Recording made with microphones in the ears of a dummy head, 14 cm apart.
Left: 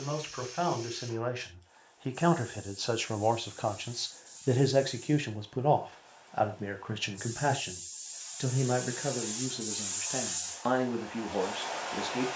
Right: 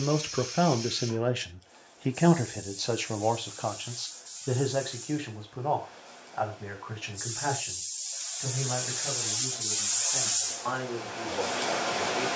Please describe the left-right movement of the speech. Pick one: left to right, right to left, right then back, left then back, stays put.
right to left.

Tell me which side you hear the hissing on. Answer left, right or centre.
right.